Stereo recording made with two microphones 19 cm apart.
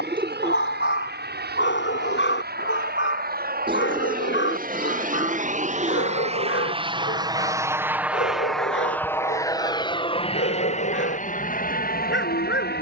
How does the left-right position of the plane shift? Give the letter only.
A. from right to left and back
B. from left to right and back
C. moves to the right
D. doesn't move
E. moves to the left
E.